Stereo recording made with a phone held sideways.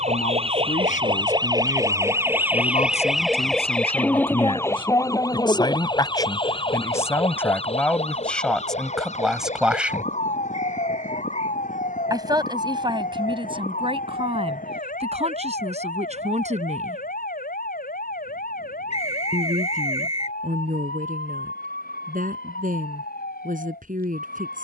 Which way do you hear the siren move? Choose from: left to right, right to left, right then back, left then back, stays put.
right to left.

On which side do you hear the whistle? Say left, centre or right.
left.